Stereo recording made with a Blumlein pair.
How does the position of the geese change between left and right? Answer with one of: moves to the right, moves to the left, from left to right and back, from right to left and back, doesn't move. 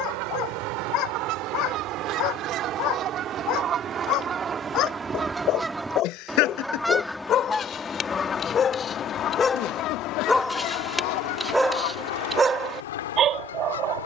moves to the left.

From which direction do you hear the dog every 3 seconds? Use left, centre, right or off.
left, left, left, centre, right.